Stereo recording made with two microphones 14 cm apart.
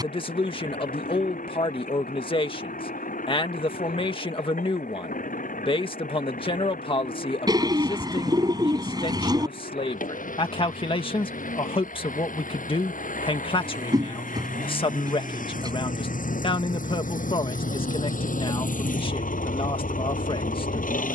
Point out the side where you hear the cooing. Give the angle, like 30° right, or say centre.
30° right.